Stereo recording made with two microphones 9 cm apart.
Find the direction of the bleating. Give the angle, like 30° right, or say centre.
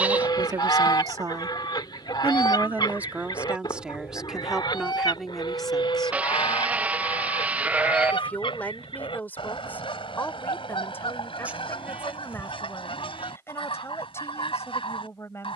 10° right.